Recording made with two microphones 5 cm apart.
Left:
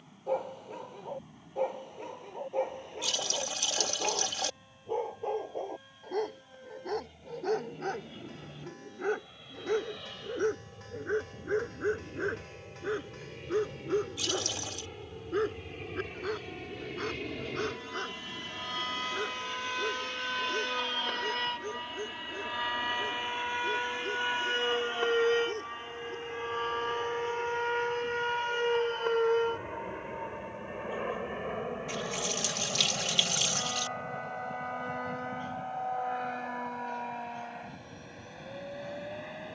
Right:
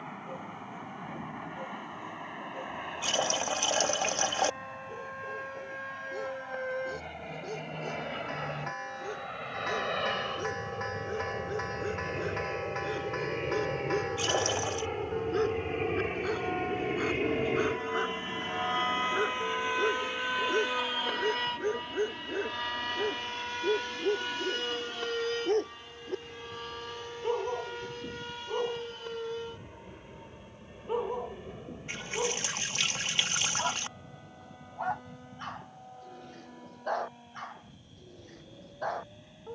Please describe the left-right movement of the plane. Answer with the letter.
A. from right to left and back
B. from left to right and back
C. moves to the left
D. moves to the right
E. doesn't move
C.